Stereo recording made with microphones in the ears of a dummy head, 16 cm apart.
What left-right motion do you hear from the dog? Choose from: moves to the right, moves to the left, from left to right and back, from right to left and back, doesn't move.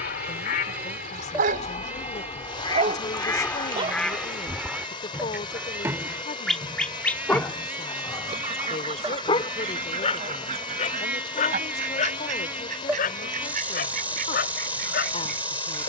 moves to the left.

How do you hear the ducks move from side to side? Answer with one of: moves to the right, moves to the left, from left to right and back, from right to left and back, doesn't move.
moves to the right.